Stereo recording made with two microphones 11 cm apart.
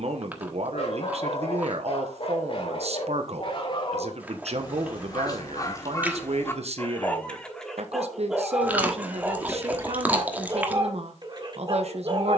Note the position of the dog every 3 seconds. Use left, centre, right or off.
left, left, centre, right.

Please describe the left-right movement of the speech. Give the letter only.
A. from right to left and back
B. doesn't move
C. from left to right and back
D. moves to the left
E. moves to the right
B.